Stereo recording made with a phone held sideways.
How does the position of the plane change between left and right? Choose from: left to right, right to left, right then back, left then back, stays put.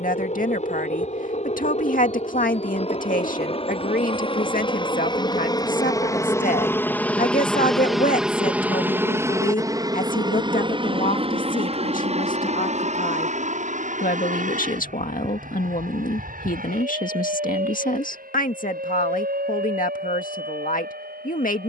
left to right.